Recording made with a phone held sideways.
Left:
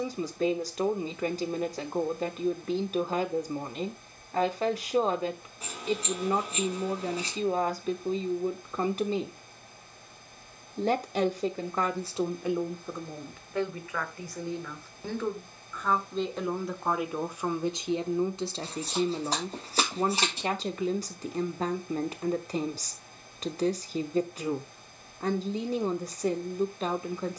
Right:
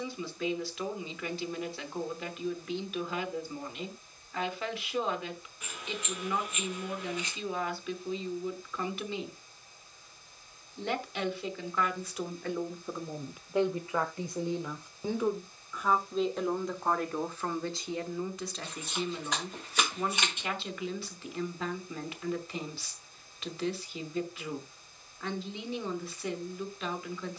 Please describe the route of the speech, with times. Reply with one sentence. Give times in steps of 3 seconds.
You can hear the speech on the left from 0 s, in the centre from 12 s and on the left from 18 s.